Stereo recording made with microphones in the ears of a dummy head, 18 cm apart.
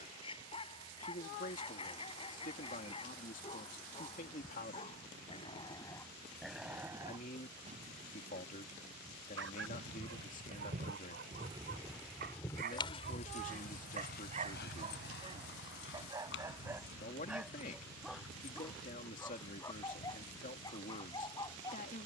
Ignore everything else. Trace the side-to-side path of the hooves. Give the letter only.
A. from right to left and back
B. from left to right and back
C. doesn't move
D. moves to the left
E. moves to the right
D.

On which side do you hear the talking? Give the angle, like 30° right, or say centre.
40° left.